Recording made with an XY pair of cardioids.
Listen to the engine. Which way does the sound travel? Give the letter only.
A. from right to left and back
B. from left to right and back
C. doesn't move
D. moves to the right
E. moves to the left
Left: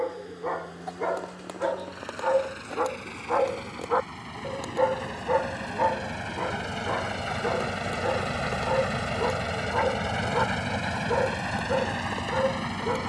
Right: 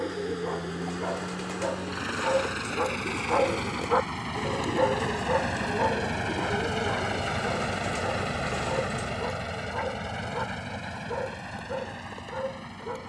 E.